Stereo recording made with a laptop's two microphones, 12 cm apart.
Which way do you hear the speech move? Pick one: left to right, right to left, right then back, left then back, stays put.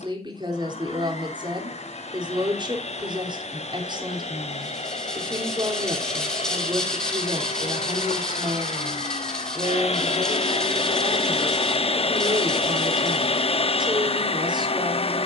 stays put.